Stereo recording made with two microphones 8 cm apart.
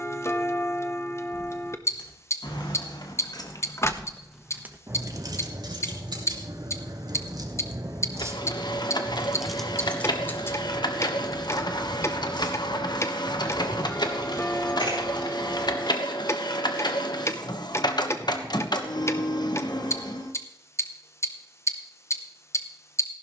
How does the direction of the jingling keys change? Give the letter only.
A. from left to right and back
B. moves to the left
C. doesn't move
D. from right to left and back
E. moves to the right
A.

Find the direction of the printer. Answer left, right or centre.
left.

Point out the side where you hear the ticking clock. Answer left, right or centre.
left.